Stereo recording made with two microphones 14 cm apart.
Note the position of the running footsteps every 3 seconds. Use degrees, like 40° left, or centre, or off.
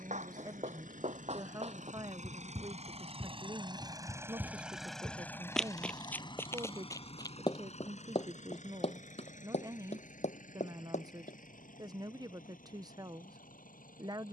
50° right, 10° right, 30° left, 50° left, off.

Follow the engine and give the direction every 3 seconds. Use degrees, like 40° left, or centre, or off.
60° right, 10° right, 50° left, 60° left, 70° left.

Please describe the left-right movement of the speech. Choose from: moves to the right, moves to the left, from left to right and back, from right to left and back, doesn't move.
doesn't move.